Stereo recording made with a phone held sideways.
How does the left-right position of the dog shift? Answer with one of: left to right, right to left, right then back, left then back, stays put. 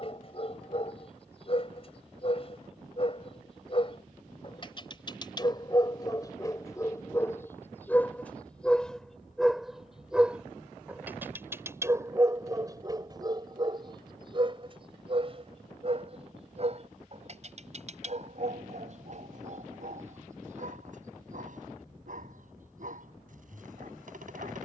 left to right.